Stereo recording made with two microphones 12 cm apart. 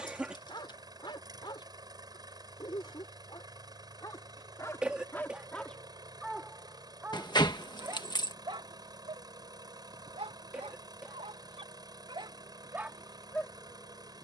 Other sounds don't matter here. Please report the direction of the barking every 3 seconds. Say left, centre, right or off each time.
left, left, right, right, centre.